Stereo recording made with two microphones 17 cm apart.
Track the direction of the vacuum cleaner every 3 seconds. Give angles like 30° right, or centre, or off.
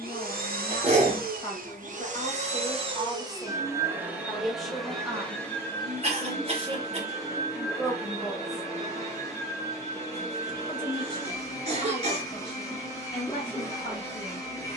50° right, centre, 20° left, 20° left, 20° left.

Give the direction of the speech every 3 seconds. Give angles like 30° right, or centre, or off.
30° left, centre, 20° right, 30° left, 30° left.